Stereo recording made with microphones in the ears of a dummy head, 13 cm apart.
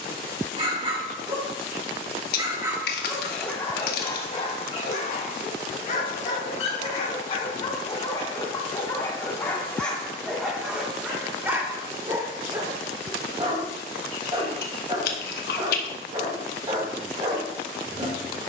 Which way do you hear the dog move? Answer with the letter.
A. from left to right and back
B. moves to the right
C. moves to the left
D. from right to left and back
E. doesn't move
D.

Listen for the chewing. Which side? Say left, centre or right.
left.